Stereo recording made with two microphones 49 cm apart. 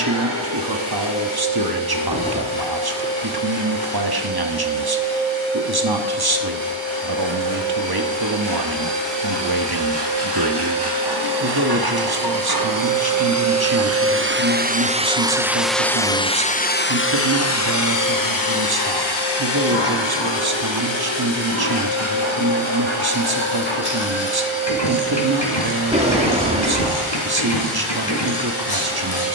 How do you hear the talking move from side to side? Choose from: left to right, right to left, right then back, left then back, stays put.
stays put.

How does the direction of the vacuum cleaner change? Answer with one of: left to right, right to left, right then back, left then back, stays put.
right to left.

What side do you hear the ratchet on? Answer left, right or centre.
left.